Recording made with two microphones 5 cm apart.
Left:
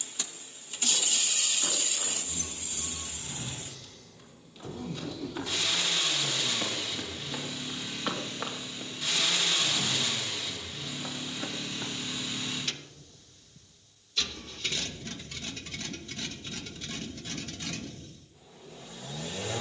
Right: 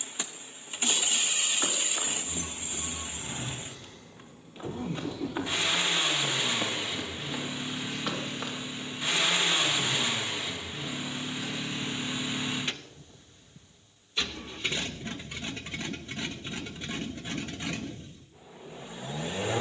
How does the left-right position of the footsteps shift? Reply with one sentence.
You can hear the footsteps travel towards the left.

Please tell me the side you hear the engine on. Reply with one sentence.
You can hear the engine on the right.